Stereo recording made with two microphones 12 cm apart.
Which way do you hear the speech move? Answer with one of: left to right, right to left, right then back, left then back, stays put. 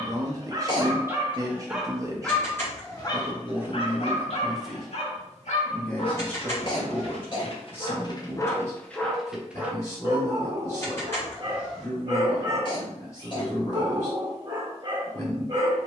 right to left.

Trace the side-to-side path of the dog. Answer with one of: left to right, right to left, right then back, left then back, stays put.
left then back.